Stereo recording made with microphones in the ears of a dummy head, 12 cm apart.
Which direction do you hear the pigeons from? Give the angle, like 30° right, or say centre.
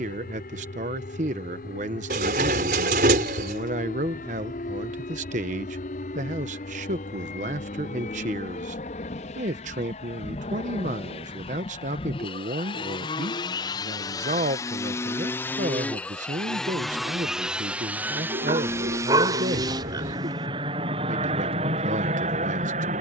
60° right.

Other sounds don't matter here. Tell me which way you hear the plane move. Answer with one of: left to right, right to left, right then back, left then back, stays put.
left to right.